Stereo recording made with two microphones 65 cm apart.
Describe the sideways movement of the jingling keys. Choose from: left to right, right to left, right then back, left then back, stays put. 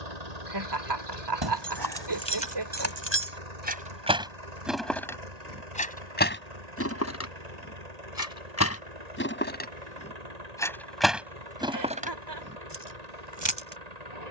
left then back.